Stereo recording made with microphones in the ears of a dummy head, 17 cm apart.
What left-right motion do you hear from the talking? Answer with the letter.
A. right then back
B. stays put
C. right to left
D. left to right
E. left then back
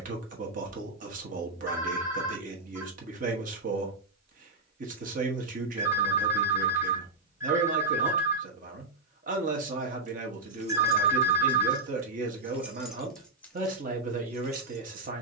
B.